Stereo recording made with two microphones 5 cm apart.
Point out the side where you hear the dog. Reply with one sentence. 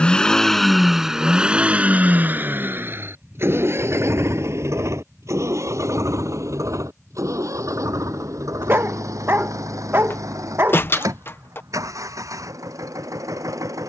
In this clip you hear the dog on the right.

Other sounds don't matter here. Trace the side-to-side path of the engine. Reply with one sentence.
In this clip you hear the engine travel towards the right.